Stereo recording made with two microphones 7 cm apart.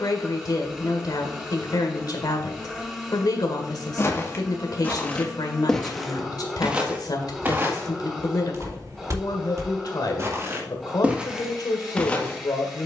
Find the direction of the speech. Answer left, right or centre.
left.